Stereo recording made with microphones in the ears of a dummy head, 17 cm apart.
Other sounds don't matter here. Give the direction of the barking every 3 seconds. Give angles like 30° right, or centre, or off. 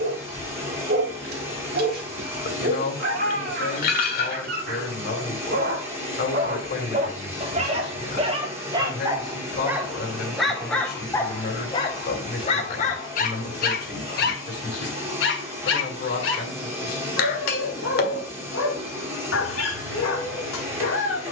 50° right, 50° right, 30° right, centre, 40° left, 70° left, 70° left.